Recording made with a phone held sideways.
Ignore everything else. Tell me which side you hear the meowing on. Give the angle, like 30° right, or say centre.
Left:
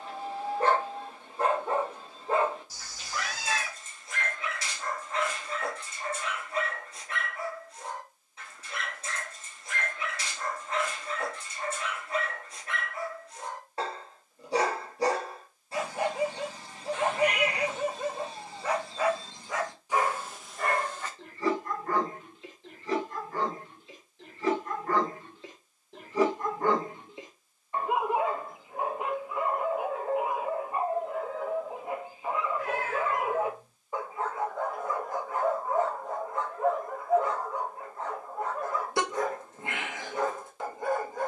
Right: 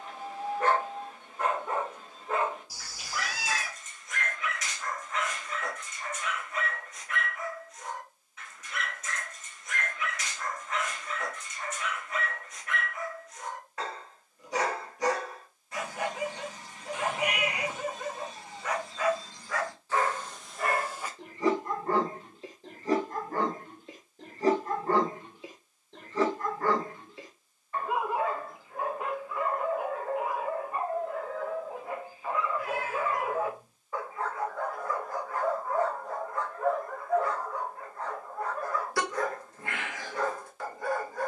10° right.